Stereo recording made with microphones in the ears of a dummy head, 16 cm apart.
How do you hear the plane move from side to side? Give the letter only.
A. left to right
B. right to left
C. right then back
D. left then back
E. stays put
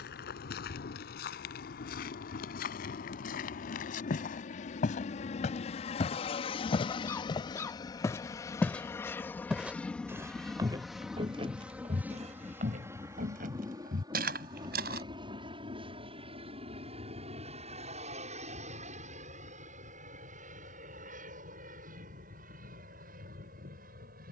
A.